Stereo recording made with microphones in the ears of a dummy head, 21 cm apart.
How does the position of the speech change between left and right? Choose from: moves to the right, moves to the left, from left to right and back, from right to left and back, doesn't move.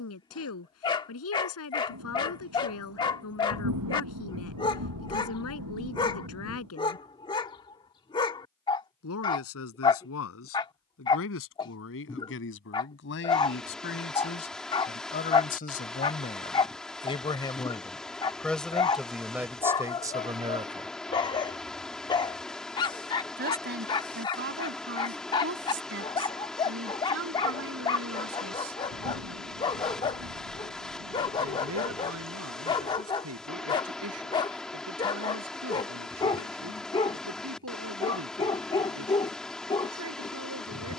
moves to the right.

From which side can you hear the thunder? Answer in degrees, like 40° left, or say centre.
80° right.